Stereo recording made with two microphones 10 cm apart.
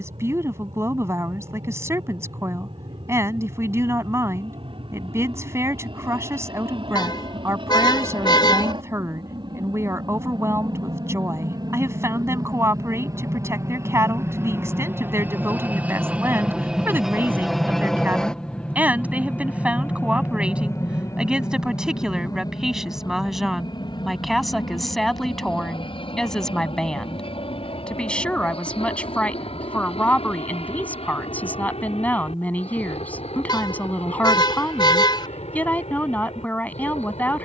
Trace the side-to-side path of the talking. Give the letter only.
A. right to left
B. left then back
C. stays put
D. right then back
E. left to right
A.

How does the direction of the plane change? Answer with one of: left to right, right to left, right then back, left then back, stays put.
right to left.